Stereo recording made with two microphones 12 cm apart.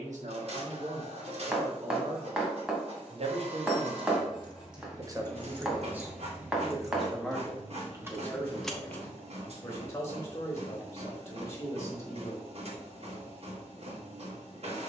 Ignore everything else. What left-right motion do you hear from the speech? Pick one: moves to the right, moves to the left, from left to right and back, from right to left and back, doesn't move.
moves to the left.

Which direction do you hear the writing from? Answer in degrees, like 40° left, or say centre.
10° right.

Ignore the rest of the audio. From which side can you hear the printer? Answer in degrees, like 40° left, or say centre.
60° right.